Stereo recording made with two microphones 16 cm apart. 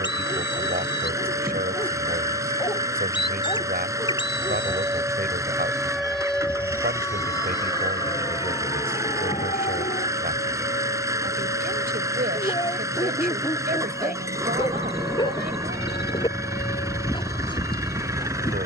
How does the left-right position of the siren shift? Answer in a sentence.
You can hear the siren travel towards the left.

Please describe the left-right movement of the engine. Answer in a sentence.
In this clip you hear the engine stay put.